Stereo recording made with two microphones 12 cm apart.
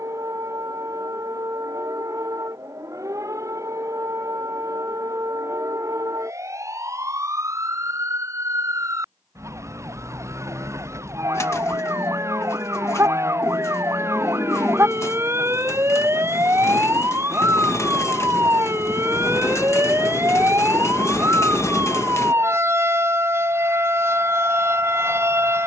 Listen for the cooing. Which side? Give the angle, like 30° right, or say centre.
20° left.